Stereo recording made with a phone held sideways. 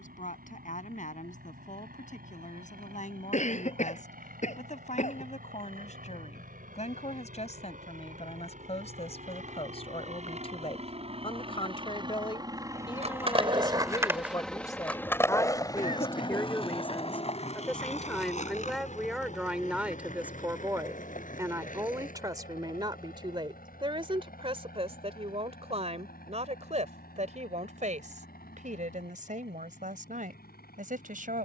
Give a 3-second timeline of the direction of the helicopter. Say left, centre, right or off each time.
right, right, right, right, centre, left, left, left, left, left, left.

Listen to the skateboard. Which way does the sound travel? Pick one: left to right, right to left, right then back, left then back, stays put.
right to left.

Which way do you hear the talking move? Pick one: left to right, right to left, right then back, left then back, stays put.
left to right.